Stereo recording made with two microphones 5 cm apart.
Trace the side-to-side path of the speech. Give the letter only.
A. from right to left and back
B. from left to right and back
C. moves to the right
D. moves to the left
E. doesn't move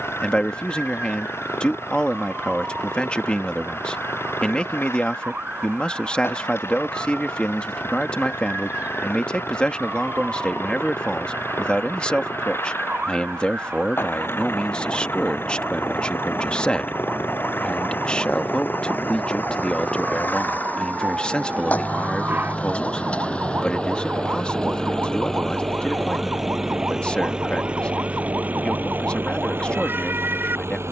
E.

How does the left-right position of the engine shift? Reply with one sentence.
You can hear the engine go from the left side to the right.